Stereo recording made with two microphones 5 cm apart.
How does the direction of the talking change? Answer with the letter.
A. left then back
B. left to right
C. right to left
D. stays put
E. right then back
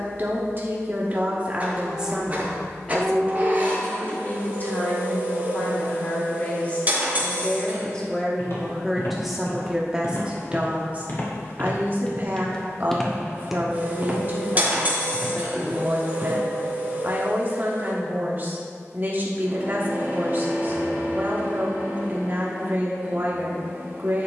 A.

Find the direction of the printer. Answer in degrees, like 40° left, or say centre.
30° right.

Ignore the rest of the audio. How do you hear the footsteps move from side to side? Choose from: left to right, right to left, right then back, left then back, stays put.
left to right.